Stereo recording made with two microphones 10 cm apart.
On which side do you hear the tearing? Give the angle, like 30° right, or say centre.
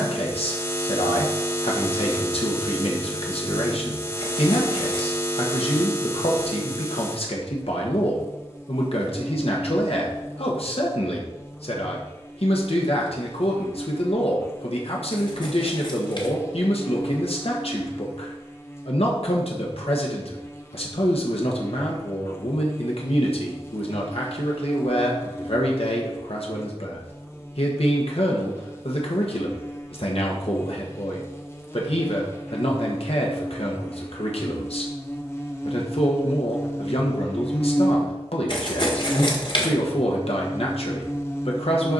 50° left.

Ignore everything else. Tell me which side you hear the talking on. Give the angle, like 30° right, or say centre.
70° left.